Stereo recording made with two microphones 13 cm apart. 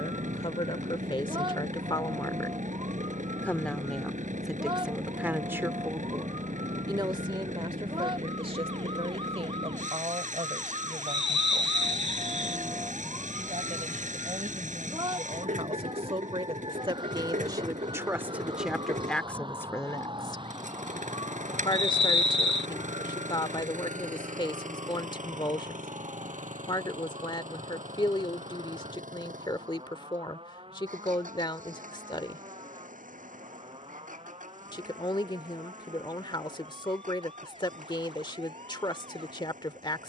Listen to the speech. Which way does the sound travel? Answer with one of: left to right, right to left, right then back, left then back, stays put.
right then back.